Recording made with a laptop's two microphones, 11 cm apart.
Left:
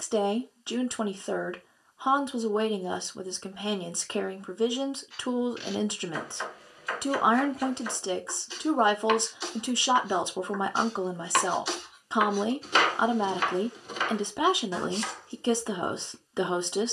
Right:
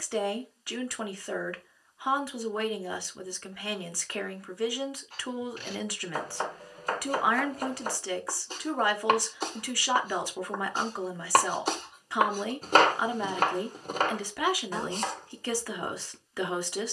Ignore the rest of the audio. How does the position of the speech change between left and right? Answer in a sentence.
In this clip you hear the speech stay in one place.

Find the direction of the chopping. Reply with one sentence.
In this clip you hear the chopping on the right.